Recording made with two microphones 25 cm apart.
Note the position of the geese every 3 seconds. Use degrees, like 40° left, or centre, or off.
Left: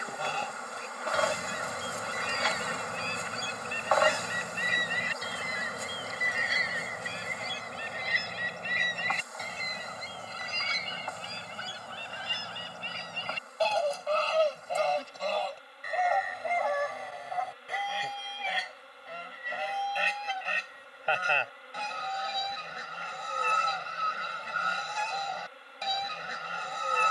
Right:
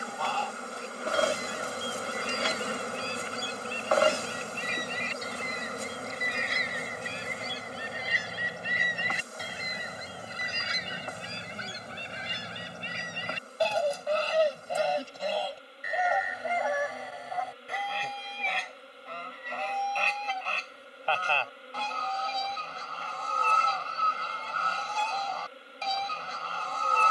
20° left, 20° left, centre, 20° right, 20° right, centre, 10° left, 20° left, 20° left.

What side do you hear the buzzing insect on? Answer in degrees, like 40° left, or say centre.
40° right.